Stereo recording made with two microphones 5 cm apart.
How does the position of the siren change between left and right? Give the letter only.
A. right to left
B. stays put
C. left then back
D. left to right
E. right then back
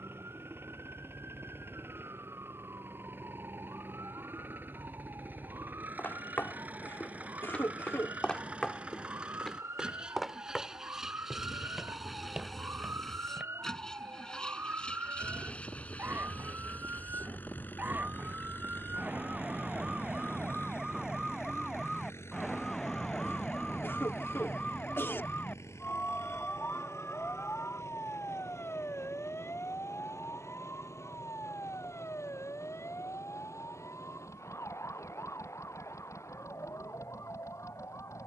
A.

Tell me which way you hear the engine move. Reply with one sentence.
You can hear the engine go from the right side to the left.